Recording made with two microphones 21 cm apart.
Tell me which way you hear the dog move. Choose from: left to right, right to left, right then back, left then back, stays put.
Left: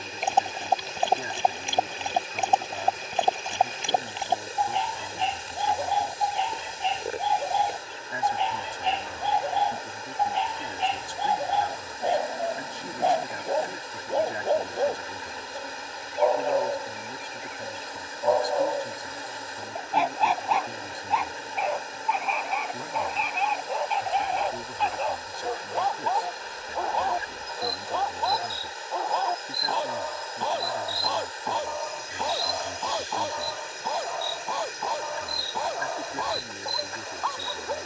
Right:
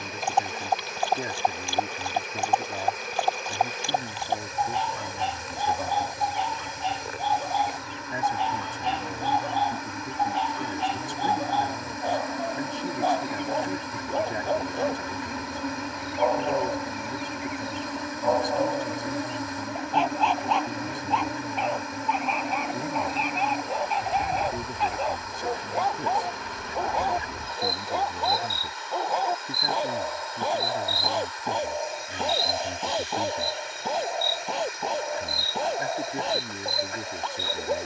left to right.